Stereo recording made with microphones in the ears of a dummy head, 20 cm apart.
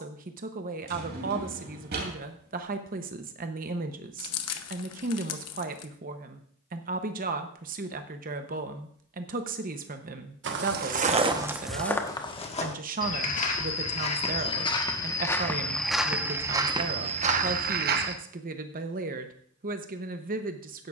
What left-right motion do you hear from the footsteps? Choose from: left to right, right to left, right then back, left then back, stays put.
left then back.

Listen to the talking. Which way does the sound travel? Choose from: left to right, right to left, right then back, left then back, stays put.
stays put.